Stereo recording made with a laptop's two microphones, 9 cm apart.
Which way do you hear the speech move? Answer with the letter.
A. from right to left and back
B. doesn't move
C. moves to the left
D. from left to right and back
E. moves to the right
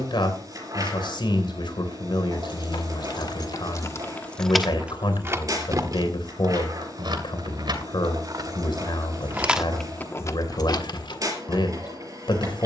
B.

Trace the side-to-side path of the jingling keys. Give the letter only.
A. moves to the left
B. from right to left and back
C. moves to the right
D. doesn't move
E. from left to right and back
E.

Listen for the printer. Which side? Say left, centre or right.
right.